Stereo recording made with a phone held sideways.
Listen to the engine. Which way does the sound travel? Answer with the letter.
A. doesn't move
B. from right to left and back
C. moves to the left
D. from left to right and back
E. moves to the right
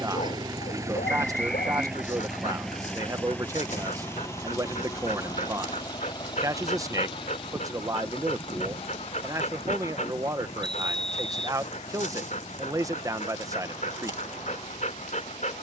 C.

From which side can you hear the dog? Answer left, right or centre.
left.